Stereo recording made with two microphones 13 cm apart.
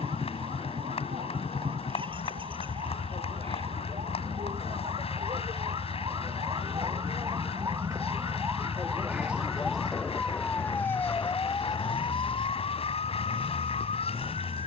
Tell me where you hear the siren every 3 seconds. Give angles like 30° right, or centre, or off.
50° right, 50° right, 30° right, 10° left, 50° left.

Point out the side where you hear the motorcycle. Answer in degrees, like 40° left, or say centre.
40° right.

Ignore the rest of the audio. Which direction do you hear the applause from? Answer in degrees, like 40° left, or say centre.
50° left.